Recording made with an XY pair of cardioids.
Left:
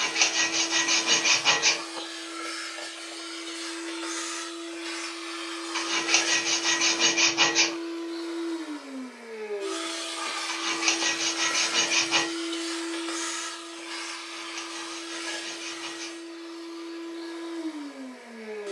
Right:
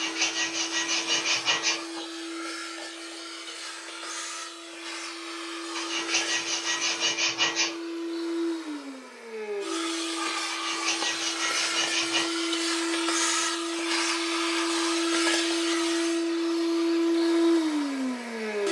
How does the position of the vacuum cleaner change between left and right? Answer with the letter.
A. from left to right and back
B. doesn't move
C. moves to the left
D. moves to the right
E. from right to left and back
D.